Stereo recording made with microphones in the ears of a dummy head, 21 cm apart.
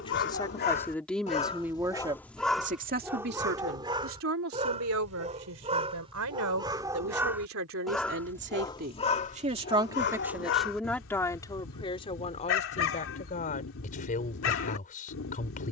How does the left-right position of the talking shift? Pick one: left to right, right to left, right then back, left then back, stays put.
right then back.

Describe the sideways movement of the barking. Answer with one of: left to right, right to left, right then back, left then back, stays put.
right then back.